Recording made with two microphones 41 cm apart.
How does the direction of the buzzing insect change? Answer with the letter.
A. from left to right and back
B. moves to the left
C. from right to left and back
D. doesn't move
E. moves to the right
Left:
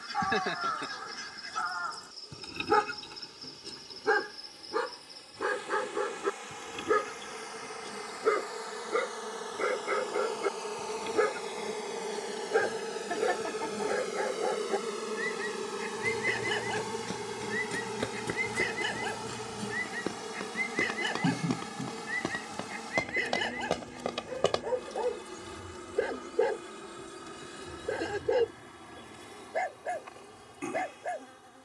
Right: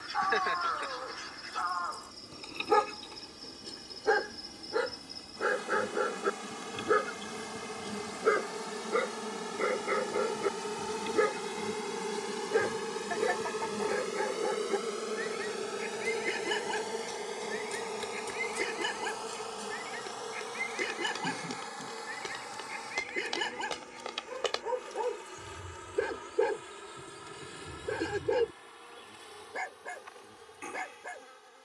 B.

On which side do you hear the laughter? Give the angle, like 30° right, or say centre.
50° left.